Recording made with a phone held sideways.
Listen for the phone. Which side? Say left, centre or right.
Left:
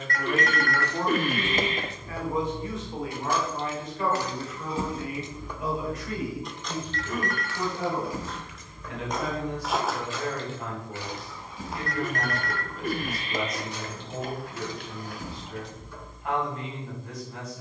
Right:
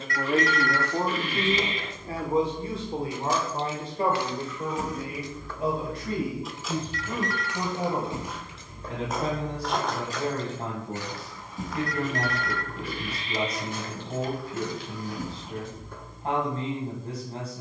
left.